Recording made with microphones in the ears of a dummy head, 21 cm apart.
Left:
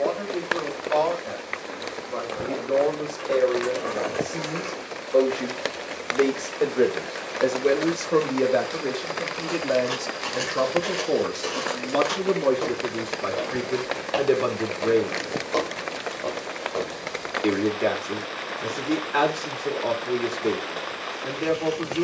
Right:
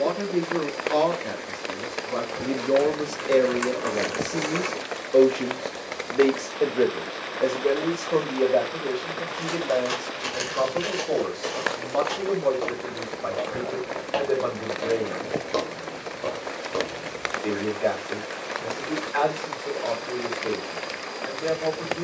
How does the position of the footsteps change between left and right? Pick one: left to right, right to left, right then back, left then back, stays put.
left then back.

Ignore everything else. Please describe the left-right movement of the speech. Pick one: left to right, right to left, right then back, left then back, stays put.
right to left.